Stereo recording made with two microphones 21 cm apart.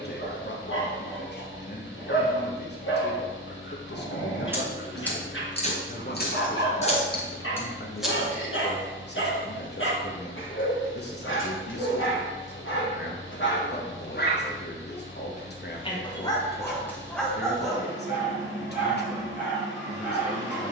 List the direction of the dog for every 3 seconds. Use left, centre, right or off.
left, left, left, left, left, centre, centre.